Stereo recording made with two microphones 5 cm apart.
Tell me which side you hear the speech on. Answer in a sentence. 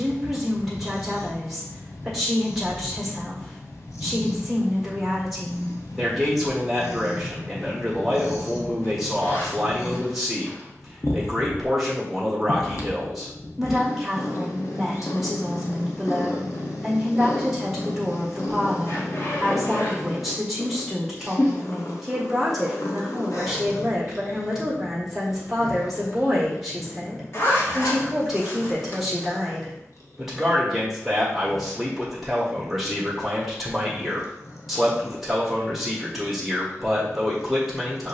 In this clip you hear the speech in the centre.